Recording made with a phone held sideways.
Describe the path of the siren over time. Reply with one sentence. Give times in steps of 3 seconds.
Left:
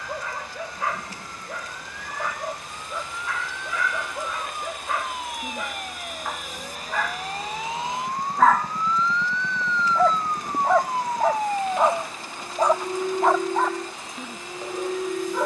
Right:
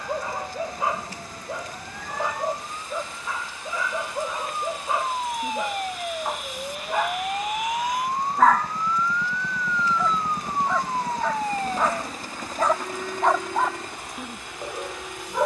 In this clip you hear the siren on the right from 0 s, in the centre from 9 s and on the left from 12 s.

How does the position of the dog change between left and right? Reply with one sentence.
In this clip you hear the dog go left and come back.